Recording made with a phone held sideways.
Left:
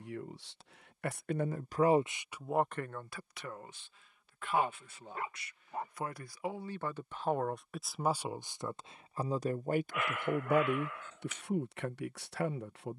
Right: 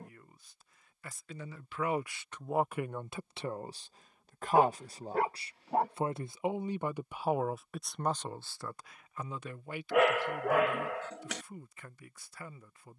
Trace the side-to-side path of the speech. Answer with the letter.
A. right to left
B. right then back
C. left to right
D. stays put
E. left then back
B.